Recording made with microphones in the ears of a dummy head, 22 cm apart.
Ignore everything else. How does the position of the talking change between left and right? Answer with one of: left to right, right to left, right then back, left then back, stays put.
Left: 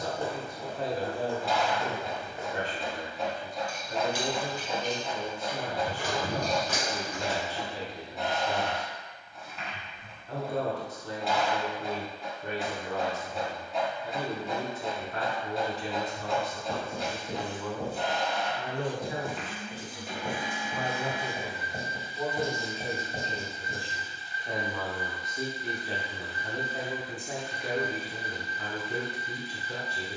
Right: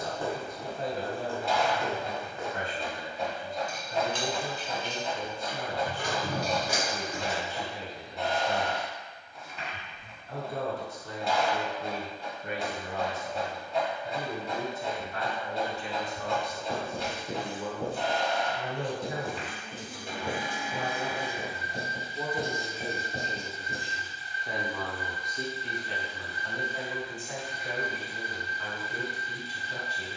right then back.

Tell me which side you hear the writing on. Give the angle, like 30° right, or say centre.
20° left.